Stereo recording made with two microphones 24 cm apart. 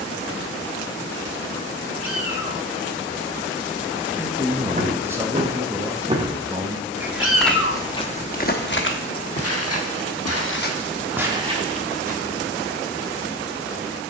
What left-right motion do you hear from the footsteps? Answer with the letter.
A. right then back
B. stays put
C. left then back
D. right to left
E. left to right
C.